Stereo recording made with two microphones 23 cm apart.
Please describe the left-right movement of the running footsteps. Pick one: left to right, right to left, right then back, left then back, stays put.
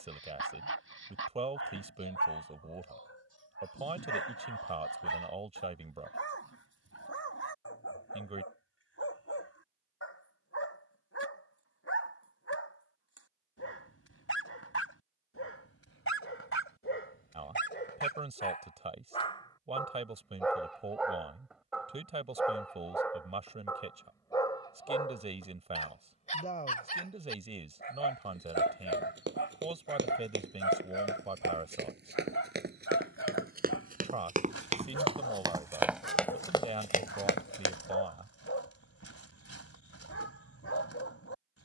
right to left.